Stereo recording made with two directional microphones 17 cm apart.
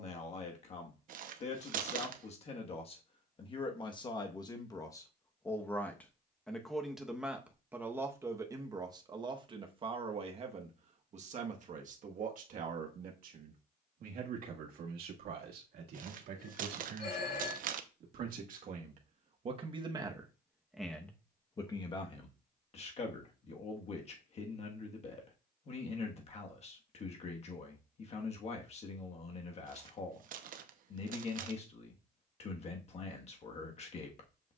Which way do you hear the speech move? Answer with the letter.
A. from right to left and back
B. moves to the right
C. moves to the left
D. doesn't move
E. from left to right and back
E.